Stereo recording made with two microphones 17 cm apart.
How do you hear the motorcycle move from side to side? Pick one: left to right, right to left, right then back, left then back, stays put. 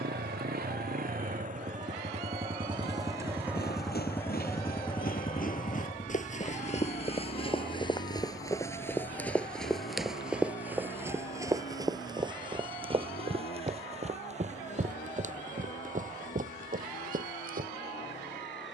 right to left.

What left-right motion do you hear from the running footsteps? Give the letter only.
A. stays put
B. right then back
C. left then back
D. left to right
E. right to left
D.